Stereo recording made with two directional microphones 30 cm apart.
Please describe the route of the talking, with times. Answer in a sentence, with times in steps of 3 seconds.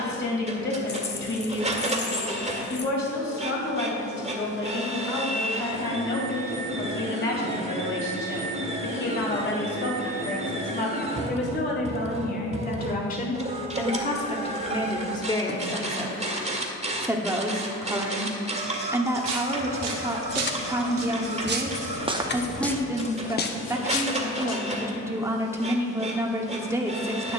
In this clip you hear the talking on the left from 0 s and in the centre from 15 s.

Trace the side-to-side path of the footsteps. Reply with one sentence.
You can hear the footsteps move from right to left.